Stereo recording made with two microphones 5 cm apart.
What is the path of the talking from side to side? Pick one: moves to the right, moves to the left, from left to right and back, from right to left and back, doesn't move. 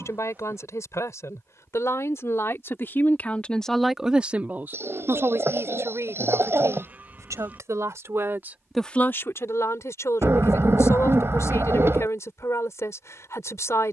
from left to right and back.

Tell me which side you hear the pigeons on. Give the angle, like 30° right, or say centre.
50° right.